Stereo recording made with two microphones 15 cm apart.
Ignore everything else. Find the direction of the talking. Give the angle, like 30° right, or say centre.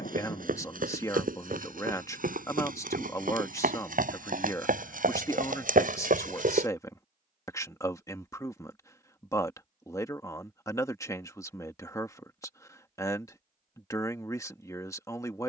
20° left.